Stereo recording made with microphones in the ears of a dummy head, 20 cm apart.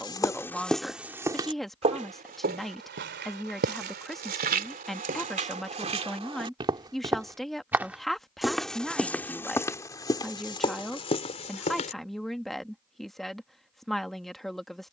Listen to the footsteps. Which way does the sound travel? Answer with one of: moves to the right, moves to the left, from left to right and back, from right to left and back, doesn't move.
from left to right and back.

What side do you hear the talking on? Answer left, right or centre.
centre.